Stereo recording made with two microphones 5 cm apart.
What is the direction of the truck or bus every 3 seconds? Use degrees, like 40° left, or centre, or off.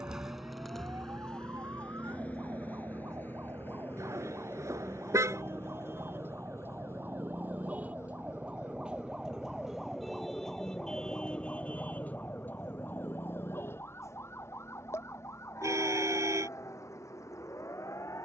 10° left, 40° left, 50° left, 60° left, 60° left, 60° left.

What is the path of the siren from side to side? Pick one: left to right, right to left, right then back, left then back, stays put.
right to left.